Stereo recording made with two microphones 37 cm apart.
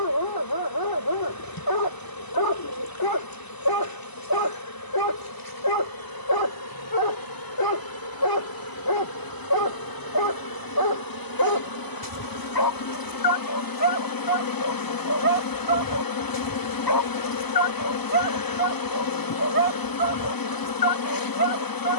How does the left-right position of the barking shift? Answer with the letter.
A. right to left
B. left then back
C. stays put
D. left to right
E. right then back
C.